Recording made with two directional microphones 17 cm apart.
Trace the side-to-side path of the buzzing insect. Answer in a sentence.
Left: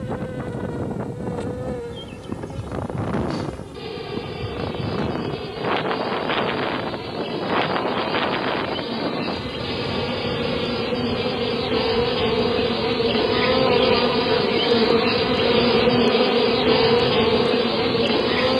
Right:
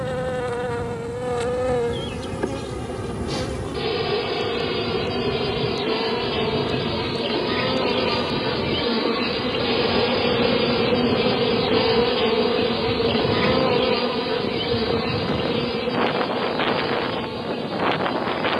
You can hear the buzzing insect travel towards the left.